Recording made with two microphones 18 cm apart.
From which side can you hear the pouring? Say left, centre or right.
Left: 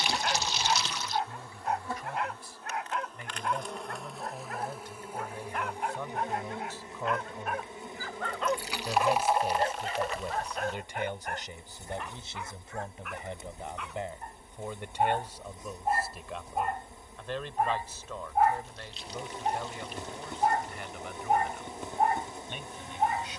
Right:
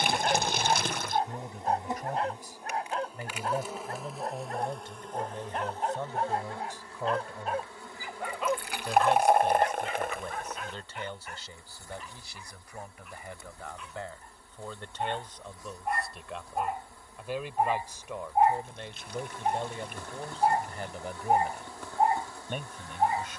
right.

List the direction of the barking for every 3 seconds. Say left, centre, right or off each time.
right, right, right, left, left, centre, right, right.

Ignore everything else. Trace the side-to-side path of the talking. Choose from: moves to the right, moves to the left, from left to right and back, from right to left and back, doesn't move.
from right to left and back.